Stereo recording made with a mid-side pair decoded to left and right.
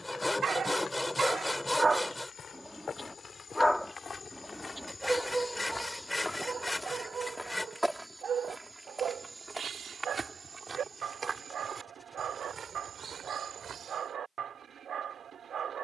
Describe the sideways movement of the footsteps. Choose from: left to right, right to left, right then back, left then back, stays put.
left to right.